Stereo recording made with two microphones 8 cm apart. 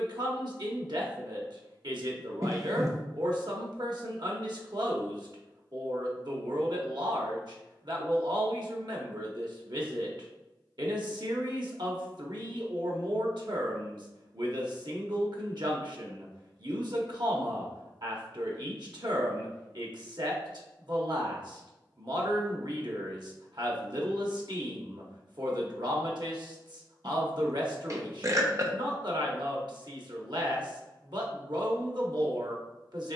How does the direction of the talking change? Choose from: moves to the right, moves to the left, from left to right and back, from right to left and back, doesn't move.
doesn't move.